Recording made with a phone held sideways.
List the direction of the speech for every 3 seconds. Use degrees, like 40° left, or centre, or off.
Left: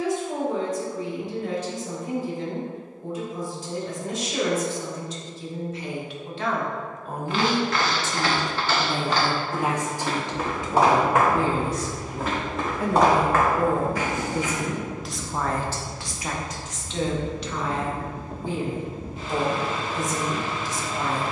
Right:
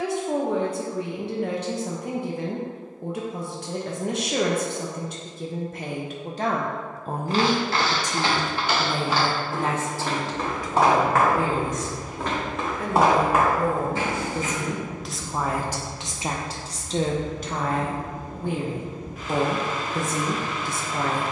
70° right, 60° right, 20° right, 20° left, 20° left, 30° right, 60° right.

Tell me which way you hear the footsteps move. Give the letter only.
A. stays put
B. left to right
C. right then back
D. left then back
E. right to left
D.